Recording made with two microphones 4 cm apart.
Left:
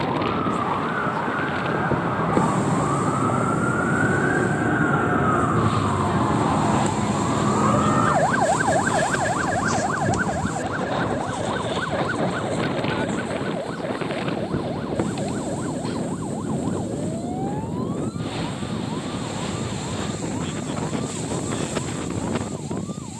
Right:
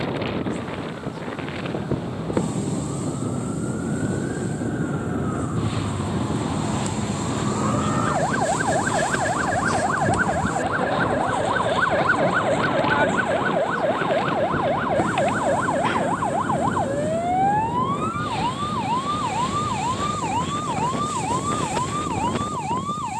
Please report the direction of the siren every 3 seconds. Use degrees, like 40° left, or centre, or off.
70° left, 50° left, 20° left, 10° right, 40° right, 50° right, 60° right, 60° right.